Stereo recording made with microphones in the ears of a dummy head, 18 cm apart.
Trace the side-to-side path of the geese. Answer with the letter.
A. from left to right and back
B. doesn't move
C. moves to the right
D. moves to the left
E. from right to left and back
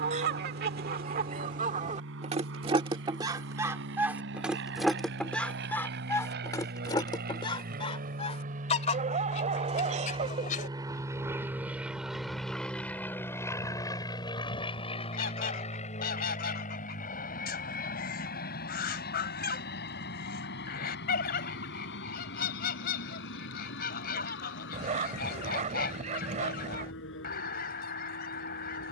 D.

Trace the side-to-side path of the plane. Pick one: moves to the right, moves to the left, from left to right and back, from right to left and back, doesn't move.
moves to the left.